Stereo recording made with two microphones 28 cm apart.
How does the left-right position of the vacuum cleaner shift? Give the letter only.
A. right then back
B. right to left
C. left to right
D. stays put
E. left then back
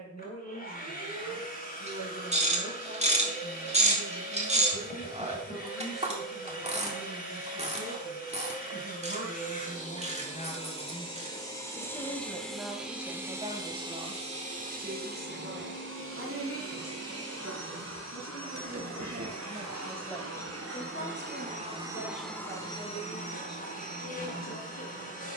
A.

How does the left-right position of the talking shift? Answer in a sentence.
In this clip you hear the talking move from left to right and back again.